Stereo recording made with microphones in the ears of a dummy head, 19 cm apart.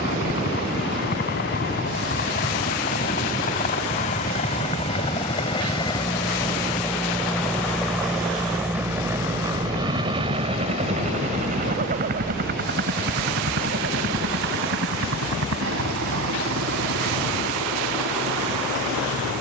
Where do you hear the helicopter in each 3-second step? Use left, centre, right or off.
left, left, centre, right, right, right, right.